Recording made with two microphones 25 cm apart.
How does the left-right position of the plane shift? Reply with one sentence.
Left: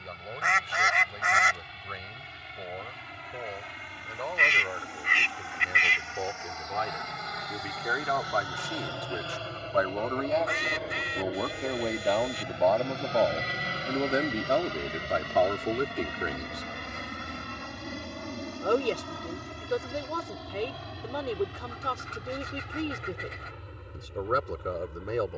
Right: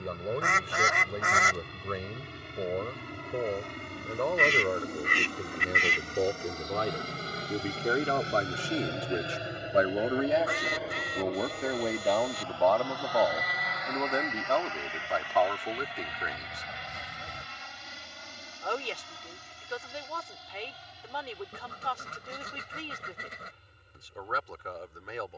You can hear the plane move to the left.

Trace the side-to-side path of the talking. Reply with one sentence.
In this clip you hear the talking move from right to left.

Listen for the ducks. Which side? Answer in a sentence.
You can hear the ducks on the right.